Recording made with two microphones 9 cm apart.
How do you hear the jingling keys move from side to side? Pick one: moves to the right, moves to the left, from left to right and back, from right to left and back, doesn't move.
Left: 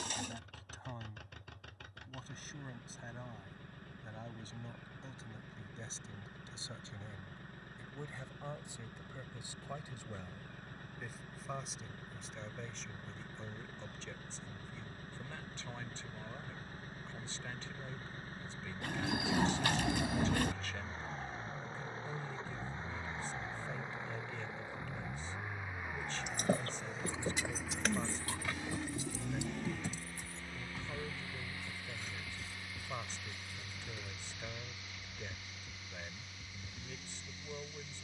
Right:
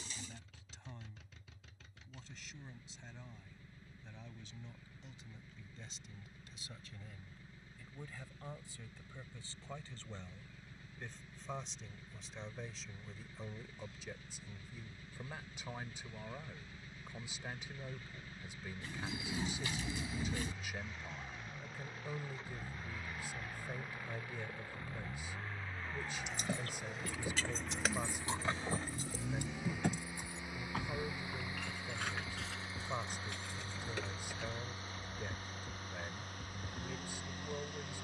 moves to the right.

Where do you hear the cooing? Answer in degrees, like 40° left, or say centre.
70° left.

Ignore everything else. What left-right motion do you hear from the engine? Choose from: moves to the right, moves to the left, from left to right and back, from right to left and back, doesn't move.
moves to the right.